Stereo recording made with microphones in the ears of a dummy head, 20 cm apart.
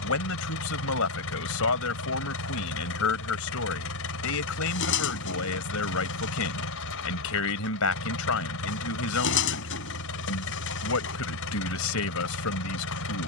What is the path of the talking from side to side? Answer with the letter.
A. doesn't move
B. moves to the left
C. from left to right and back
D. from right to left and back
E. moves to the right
A.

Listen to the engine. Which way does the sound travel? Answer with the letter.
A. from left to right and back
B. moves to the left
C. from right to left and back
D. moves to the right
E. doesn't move
E.